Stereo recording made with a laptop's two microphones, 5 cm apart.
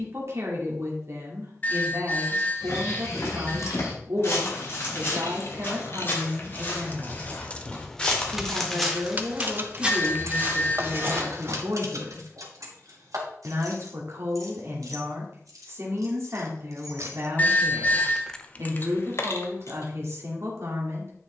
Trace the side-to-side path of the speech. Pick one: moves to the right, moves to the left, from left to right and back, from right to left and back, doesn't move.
doesn't move.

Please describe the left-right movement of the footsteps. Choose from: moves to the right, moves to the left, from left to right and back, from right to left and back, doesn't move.
moves to the right.